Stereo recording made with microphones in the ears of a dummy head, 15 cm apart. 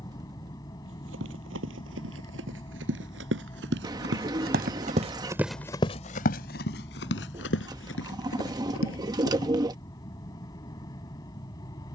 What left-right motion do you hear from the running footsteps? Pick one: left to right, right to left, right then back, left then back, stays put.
right to left.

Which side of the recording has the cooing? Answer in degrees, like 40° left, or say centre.
20° right.